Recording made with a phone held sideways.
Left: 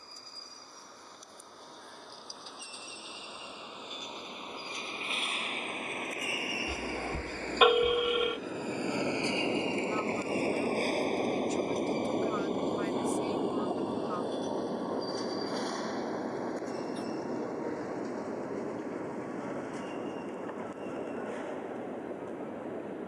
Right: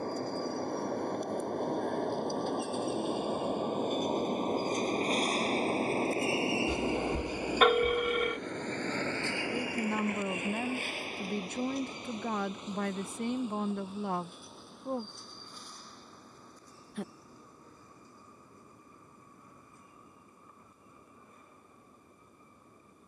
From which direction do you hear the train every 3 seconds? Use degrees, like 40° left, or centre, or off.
60° right, 40° right, 10° right, 30° left, 60° left, 70° left, 80° left, 80° left.